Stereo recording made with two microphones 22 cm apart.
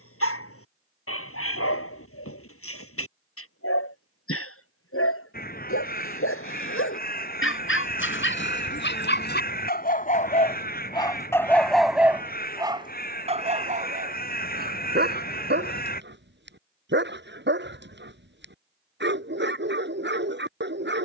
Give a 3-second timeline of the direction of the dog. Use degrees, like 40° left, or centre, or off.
80° left, 80° left, 60° left, 30° left, 30° right, 50° right, 50° right.